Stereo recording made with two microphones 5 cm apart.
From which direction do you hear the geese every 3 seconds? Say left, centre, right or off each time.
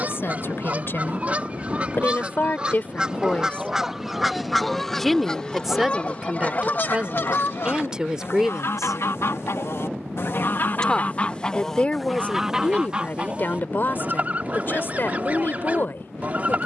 right, centre, left, left, right, right.